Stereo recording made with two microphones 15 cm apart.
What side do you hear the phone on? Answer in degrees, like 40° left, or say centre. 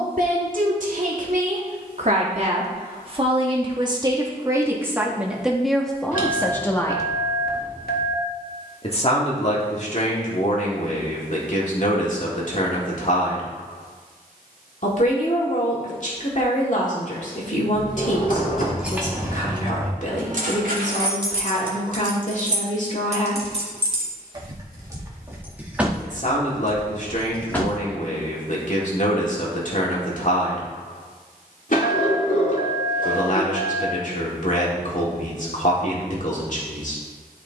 70° left.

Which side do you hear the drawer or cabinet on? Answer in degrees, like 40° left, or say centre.
60° left.